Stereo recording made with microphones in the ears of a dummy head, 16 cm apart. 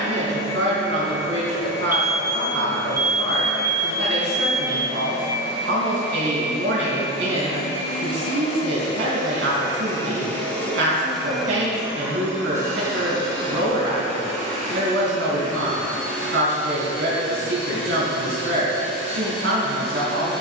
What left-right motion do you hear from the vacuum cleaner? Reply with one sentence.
In this clip you hear the vacuum cleaner move to the right.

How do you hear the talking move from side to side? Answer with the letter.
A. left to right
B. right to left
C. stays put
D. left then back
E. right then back
C.